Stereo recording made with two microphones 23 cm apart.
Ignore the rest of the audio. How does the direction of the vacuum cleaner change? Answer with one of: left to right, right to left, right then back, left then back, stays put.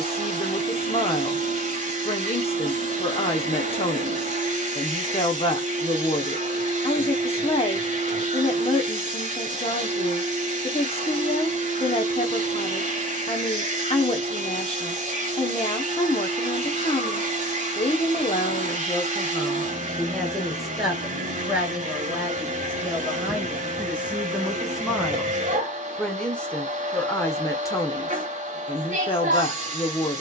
stays put.